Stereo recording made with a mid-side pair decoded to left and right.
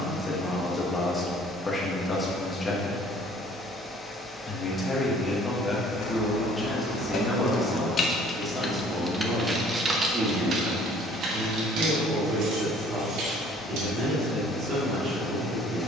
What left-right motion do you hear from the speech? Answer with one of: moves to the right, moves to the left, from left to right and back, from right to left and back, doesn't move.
moves to the right.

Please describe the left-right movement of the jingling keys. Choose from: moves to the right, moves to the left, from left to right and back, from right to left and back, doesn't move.
moves to the right.